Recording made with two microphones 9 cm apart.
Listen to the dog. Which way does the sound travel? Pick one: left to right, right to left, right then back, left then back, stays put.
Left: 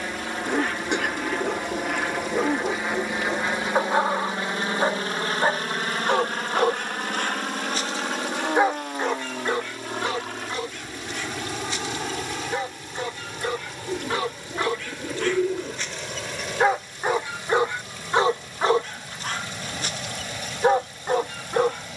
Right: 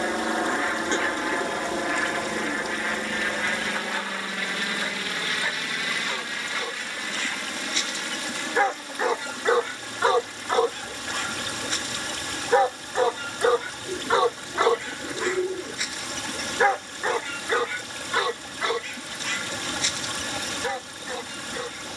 right then back.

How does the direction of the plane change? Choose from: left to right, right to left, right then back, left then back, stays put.
right to left.